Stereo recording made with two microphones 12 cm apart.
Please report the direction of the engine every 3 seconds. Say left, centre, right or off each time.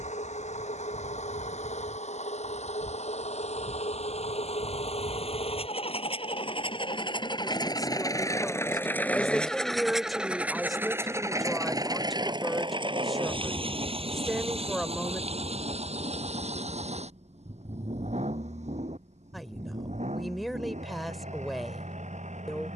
left, left, left, centre, right, right, right, right.